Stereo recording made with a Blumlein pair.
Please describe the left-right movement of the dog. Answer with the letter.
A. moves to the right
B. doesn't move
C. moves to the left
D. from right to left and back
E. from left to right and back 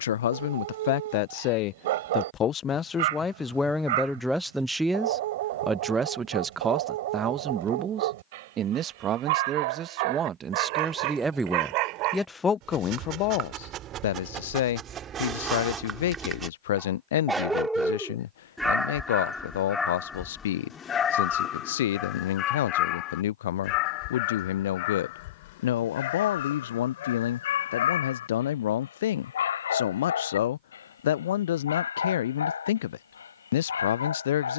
C.